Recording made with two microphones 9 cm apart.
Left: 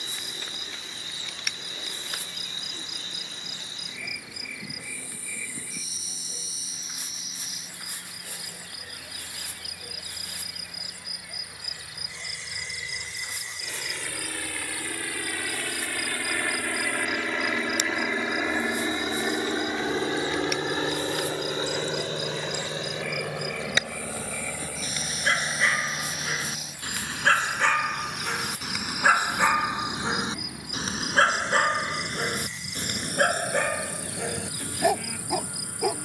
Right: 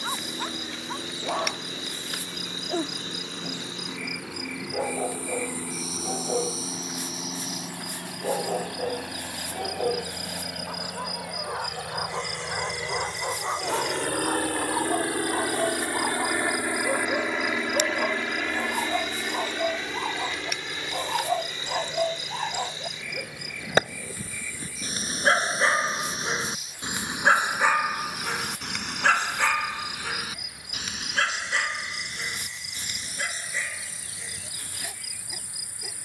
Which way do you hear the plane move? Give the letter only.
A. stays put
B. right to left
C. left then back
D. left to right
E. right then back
B.